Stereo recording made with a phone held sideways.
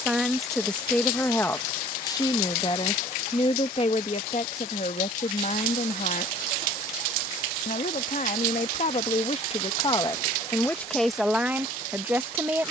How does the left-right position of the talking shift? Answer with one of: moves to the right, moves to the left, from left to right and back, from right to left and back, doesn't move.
from right to left and back.